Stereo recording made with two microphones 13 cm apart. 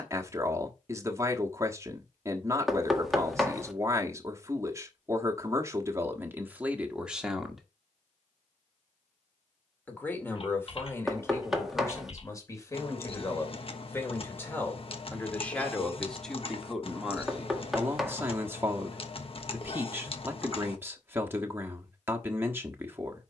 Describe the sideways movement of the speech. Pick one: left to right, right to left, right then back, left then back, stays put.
left then back.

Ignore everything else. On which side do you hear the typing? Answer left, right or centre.
left.